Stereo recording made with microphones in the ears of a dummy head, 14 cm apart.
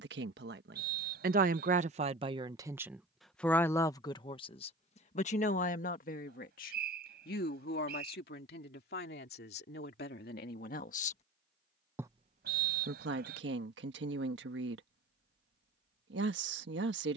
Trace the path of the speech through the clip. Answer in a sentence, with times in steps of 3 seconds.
You can hear the speech on the right from 0 s, on the left from 3 s and on the right from 12 s.